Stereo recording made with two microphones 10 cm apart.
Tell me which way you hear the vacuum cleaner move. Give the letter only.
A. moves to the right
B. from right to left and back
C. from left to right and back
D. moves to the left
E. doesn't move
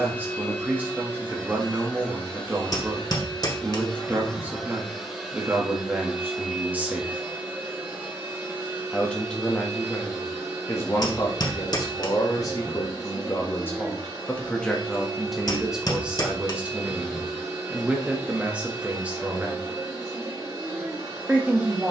A.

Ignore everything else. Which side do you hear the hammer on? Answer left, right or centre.
left.